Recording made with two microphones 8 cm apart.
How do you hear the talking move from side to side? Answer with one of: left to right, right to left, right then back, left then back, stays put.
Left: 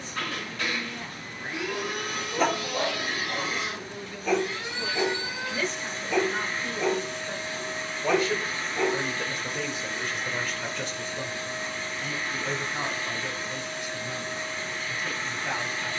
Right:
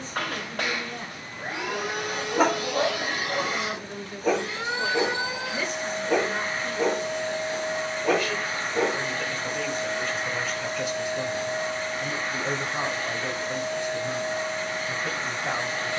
left then back.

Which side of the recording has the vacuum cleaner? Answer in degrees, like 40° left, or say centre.
70° right.